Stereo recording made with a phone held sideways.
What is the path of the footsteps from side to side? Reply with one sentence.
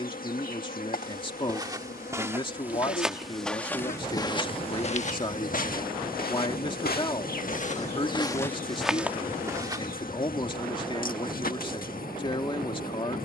You can hear the footsteps go left and come back.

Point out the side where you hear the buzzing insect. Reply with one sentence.
You can hear the buzzing insect on the left.